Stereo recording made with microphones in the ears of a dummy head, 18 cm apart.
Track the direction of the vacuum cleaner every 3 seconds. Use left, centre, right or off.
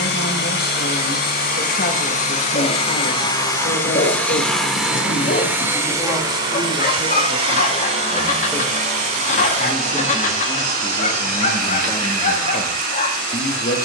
left, centre, right, right, right.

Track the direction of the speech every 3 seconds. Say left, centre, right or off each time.
left, left, centre, centre, left.